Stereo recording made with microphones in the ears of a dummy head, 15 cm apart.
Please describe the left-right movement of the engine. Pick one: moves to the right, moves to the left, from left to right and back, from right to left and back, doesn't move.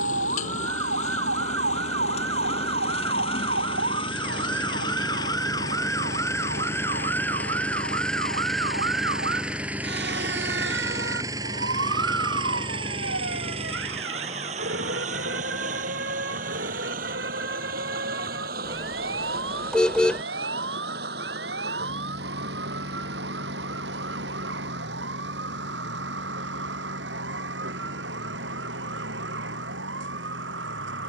moves to the right.